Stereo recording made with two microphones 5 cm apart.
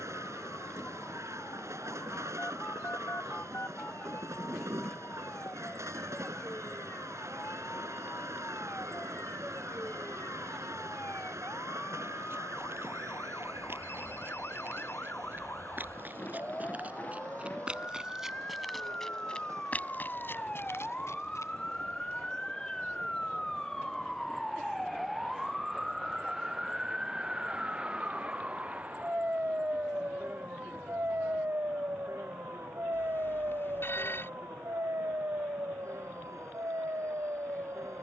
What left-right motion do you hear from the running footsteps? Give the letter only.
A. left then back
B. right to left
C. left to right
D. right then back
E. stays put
B.